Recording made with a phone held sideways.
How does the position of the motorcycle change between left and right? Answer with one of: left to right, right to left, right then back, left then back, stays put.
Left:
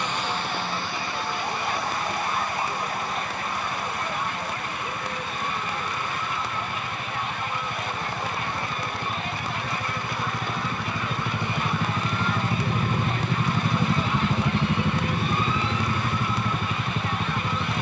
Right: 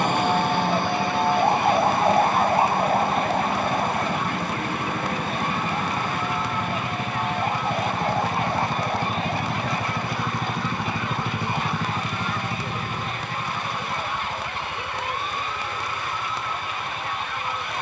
right to left.